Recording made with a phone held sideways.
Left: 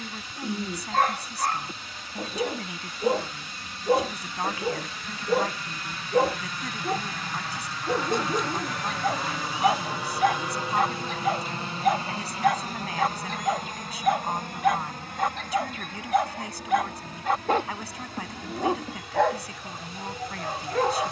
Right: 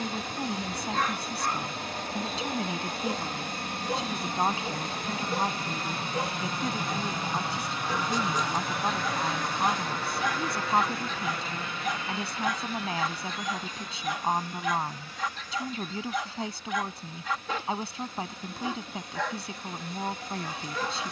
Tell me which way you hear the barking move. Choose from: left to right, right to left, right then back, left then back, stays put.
stays put.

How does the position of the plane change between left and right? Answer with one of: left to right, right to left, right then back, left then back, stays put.
right to left.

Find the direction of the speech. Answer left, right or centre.
right.